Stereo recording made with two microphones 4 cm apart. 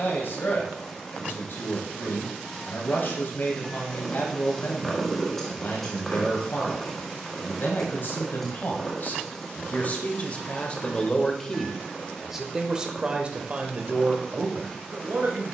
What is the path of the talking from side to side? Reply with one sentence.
In this clip you hear the talking move from left to right.